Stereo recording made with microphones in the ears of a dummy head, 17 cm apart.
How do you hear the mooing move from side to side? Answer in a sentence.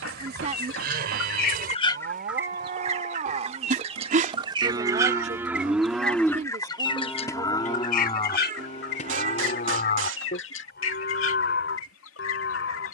You can hear the mooing travel towards the left.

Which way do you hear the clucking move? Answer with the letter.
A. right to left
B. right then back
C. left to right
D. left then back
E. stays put
B.